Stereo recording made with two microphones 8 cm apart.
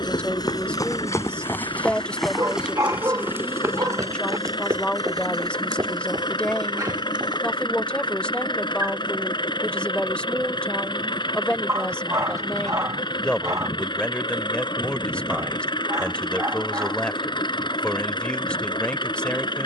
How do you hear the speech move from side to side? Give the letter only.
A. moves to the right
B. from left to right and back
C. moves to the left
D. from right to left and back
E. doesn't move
E.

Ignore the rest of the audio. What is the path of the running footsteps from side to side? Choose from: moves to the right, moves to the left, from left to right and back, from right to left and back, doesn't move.
moves to the right.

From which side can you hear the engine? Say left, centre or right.
left.